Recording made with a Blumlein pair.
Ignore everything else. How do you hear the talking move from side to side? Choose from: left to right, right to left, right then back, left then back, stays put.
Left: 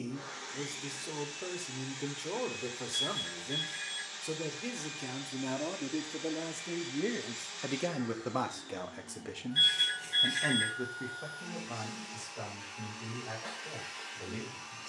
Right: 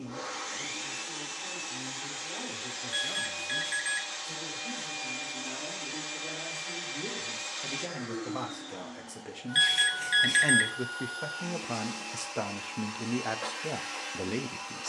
left to right.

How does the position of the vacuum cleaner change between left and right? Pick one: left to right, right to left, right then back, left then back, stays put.
stays put.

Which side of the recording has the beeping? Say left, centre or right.
right.